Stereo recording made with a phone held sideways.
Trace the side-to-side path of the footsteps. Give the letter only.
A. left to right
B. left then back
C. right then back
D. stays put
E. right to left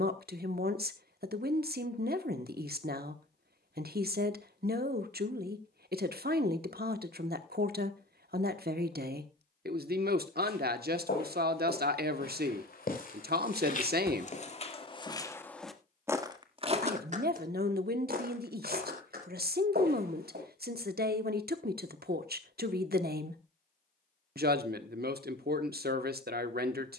A.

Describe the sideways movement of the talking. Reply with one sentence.
You can hear the talking stay put.